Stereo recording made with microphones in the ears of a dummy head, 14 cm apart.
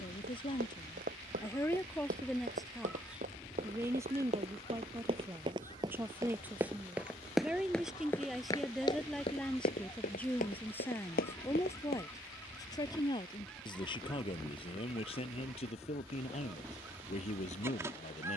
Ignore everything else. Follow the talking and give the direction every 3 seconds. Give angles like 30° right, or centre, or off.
20° left, 20° right, 10° right, 10° left, 30° left, 40° left.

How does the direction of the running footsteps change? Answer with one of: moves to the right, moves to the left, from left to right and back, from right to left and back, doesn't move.
moves to the left.